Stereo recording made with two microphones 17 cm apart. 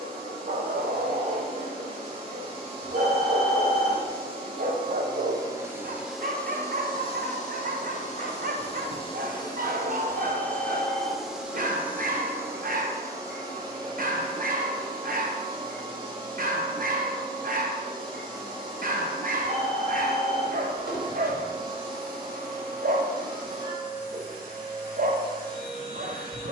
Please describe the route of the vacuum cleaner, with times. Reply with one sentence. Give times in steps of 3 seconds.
You can hear the vacuum cleaner on the right from 0 s, on the left from 6 s, in the centre from 9 s and on the right from 12 s.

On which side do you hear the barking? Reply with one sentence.
In this clip you hear the barking on the right.